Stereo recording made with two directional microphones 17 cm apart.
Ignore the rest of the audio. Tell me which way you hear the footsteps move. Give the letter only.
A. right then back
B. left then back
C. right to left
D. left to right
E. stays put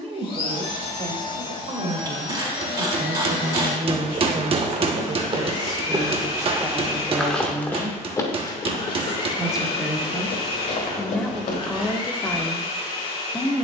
C.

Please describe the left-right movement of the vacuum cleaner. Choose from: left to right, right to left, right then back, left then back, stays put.
stays put.